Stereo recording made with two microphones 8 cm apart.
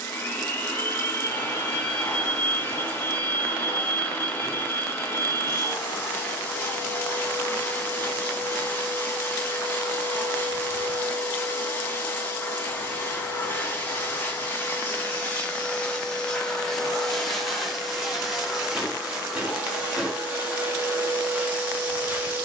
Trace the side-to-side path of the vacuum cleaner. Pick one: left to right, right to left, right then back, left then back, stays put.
left to right.